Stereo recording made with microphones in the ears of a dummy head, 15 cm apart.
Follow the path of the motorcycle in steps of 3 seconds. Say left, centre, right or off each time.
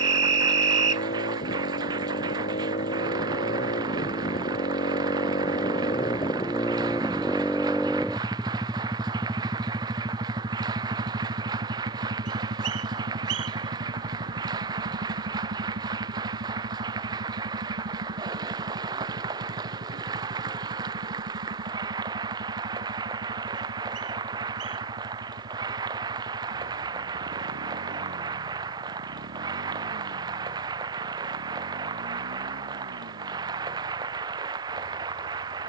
left, left, centre, right, right, right, right, right, right, right, right, right.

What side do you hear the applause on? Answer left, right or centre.
right.